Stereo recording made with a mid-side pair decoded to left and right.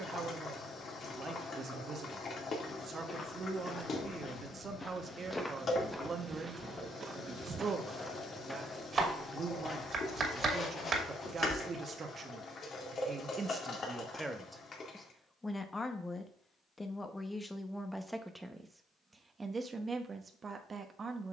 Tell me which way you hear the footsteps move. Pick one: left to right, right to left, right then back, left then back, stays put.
right then back.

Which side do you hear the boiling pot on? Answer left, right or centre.
left.